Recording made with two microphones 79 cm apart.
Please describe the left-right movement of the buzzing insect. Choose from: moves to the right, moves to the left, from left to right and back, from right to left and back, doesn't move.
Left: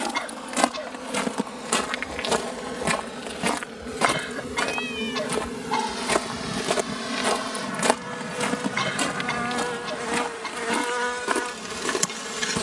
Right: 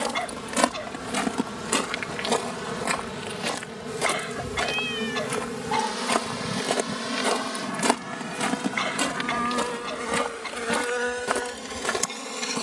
moves to the left.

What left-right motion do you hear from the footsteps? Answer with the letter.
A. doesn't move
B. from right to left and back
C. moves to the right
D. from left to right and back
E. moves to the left
B.